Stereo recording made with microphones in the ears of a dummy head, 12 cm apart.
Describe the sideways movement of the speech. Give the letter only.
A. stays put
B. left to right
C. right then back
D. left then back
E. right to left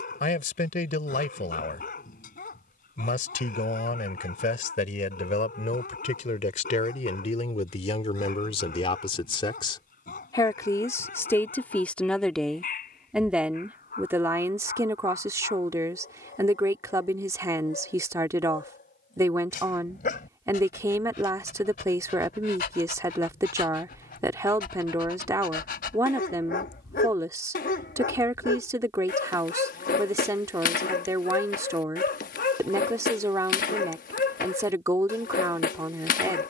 B.